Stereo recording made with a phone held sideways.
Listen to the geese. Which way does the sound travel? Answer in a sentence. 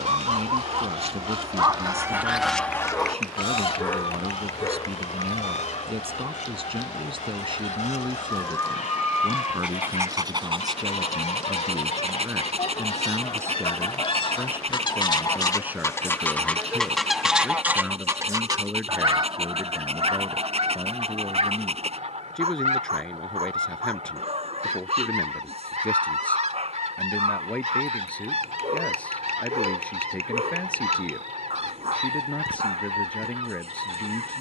You can hear the geese go left and come back.